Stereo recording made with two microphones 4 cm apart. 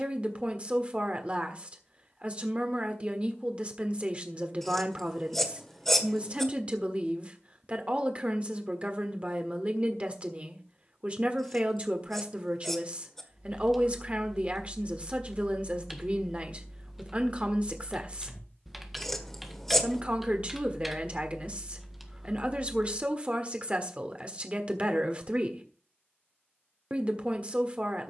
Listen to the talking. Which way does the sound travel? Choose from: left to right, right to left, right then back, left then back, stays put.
stays put.